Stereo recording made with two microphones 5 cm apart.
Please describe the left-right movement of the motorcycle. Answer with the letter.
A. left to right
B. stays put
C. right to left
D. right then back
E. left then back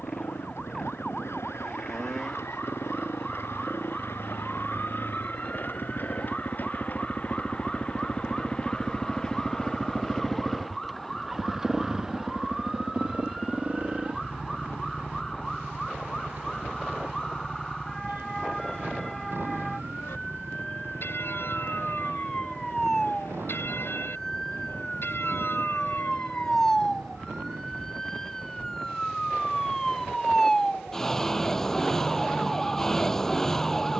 A.